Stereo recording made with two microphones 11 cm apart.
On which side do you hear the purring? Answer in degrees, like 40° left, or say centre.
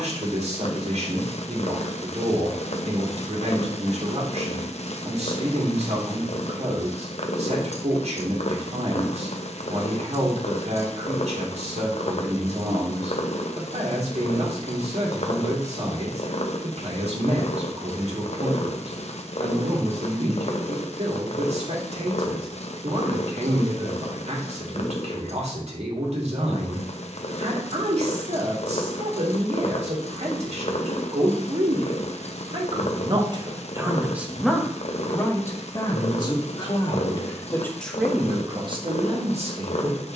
70° left.